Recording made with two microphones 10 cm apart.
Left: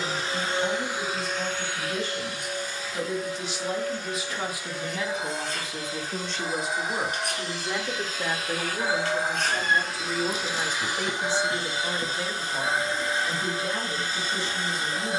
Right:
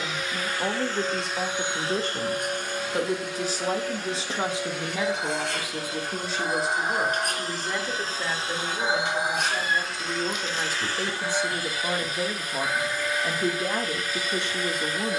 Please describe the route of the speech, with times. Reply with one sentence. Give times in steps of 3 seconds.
In this clip you hear the speech on the right from 0 s, in the centre from 6 s and on the right from 12 s.